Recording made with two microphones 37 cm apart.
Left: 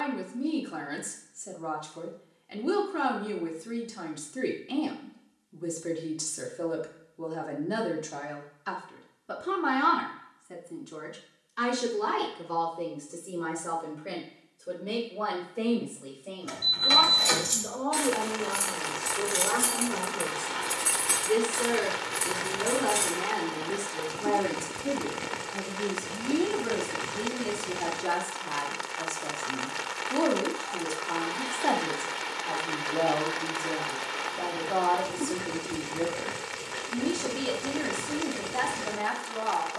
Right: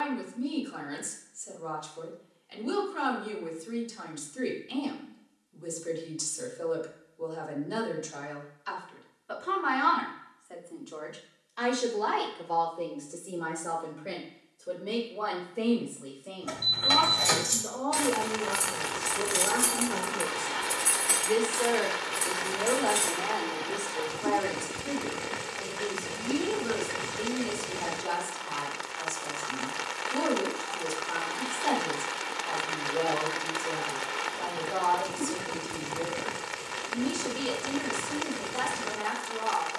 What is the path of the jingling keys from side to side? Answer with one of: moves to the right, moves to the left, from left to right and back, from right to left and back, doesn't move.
moves to the left.